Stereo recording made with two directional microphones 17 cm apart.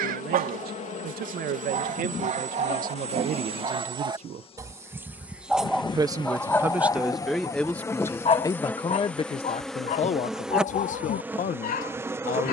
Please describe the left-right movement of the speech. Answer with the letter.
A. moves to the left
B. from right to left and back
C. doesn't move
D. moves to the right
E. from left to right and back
A.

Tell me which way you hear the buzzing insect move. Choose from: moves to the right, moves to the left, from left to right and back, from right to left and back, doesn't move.
moves to the right.